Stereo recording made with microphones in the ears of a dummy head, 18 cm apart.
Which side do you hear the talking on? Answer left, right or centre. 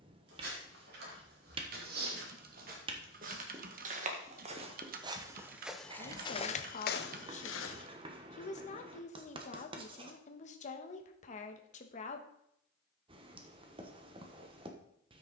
left.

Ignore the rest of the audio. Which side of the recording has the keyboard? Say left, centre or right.
right.